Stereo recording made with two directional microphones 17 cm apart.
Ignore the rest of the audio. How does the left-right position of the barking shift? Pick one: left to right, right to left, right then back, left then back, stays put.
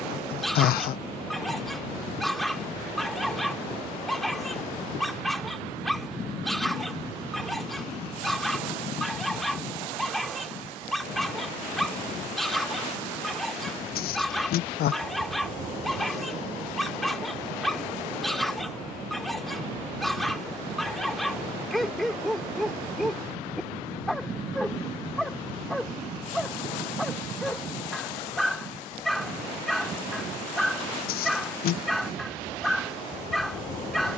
stays put.